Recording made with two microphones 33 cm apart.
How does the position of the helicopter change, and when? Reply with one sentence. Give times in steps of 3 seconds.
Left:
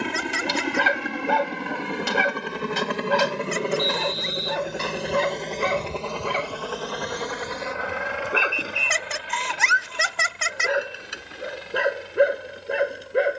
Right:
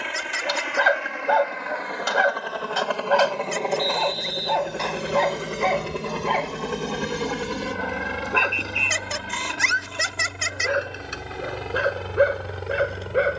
You can hear the helicopter on the left from 0 s, in the centre from 3 s and on the right from 6 s.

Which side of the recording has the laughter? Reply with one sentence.
You can hear the laughter on the left.